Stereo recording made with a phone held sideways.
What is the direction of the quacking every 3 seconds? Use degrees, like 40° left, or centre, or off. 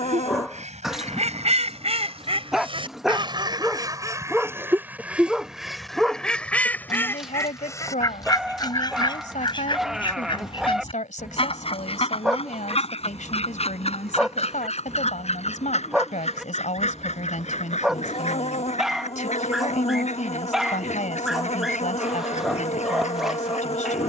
60° right, 20° right, 20° left, 40° left, 50° left, 60° left, 60° left, 60° left.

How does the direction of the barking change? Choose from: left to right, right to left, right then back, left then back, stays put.
stays put.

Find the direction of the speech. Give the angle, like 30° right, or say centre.
70° left.